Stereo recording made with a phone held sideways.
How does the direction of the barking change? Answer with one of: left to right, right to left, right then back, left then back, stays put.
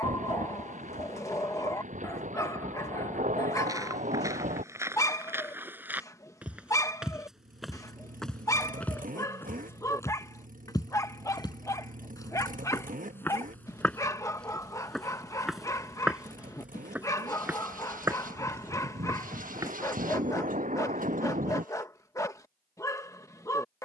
stays put.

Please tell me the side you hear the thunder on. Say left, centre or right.
right.